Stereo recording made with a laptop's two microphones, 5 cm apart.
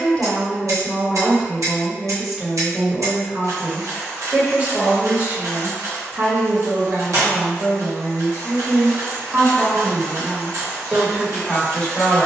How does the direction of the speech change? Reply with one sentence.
In this clip you hear the speech move from left to right and back again.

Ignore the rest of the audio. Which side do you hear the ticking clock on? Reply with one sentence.
You can hear the ticking clock on the right.